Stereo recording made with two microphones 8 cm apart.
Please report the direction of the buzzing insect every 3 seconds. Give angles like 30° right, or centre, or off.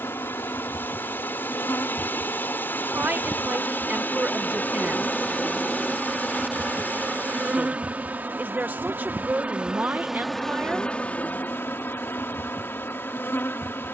40° left, 20° left, 20° right, centre, 30° left.